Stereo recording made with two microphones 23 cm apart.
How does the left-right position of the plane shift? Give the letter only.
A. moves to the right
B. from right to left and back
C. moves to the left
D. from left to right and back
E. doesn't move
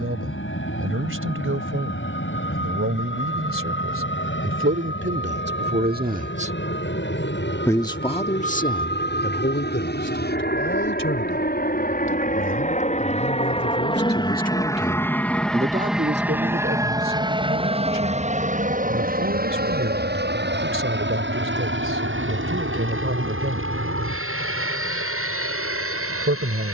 A.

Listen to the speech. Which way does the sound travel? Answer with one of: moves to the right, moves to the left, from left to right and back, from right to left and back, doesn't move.
from right to left and back.